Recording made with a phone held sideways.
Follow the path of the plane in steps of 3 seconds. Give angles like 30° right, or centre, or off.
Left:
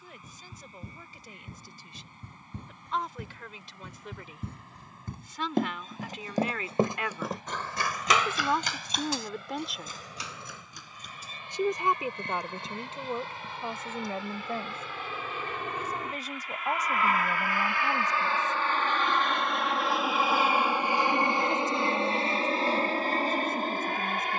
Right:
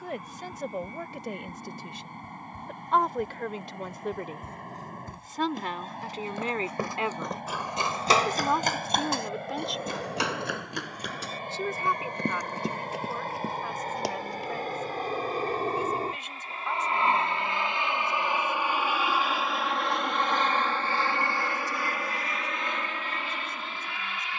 70° right, 70° right, 60° right, 60° right, 50° right, 30° right, centre, 30° left.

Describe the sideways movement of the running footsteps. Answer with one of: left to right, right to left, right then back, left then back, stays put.
left to right.